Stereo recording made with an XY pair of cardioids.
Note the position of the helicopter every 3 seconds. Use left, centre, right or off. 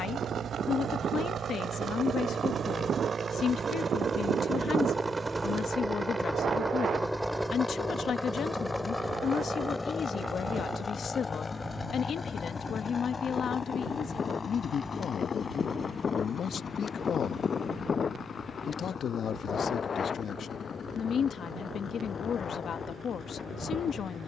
right, right, centre, left, left, left, left, left.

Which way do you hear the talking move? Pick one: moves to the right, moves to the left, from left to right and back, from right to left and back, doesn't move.
doesn't move.